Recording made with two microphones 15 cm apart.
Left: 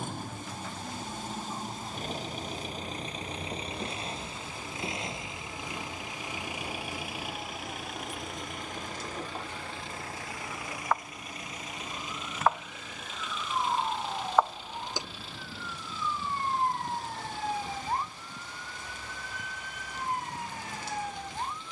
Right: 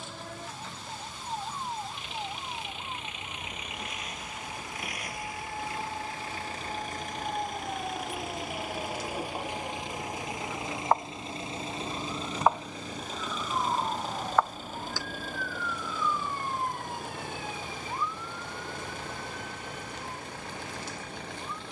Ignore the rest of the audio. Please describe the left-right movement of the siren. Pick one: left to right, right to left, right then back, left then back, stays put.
right to left.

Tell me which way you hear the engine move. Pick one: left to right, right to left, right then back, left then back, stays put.
left to right.